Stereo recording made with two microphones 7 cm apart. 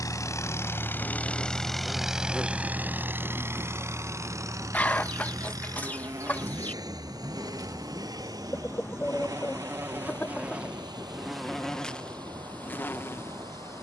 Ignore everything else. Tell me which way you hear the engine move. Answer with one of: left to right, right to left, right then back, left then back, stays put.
left to right.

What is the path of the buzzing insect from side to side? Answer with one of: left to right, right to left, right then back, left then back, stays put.
right then back.